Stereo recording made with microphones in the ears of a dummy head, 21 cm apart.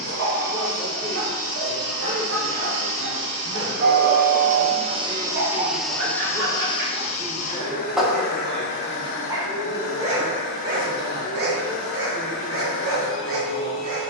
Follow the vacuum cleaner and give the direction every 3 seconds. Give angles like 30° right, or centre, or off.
70° right, 30° right, 30° left, 60° left, 60° left.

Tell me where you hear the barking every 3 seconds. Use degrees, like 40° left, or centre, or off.
70° right, 60° right, 20° right, 40° right, 60° right.